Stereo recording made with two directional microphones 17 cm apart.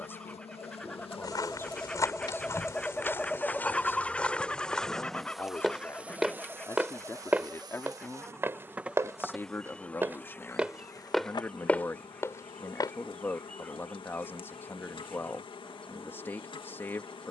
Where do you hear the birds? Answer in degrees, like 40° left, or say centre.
10° left.